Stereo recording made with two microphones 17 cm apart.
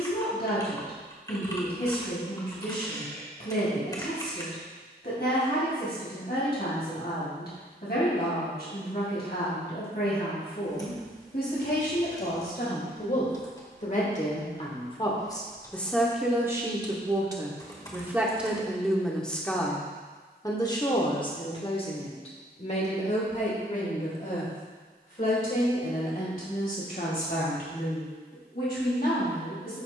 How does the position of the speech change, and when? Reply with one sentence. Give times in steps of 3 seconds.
In this clip you hear the speech on the left from 0 s, in the centre from 15 s and on the left from 21 s.